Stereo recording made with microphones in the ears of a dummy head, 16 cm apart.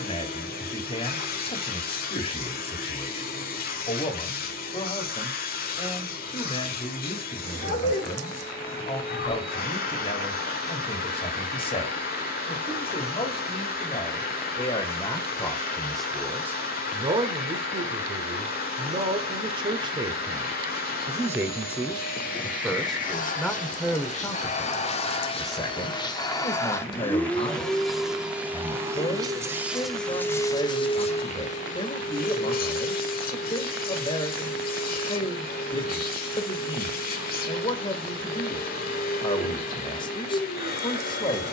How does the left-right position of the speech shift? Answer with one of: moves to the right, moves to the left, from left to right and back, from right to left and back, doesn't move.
from left to right and back.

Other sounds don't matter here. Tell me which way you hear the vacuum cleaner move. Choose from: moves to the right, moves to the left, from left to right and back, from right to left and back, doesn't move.
from left to right and back.